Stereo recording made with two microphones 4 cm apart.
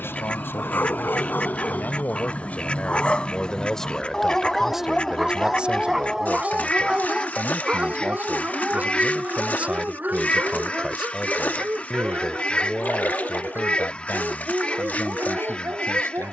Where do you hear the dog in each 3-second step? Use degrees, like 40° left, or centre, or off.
40° left, 10° left, 20° right, 40° right, 50° right, 60° right.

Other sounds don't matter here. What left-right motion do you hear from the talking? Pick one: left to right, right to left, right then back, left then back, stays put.
right then back.